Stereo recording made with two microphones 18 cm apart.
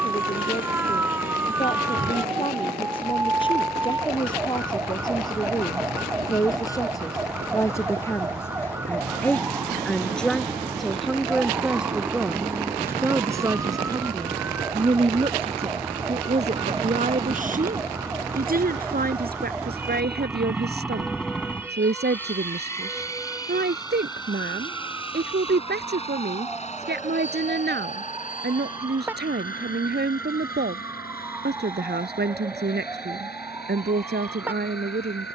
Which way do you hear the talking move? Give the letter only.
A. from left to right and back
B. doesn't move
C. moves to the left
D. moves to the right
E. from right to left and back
D.